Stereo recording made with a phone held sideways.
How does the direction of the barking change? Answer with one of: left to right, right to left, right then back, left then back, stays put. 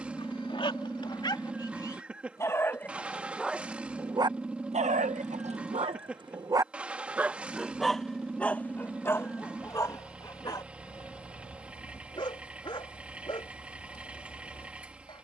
right then back.